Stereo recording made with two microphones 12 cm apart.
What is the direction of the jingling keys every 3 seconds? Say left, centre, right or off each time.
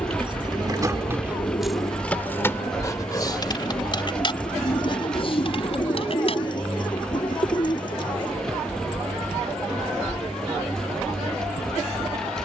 centre, left, left, off.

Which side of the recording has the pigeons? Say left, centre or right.
left.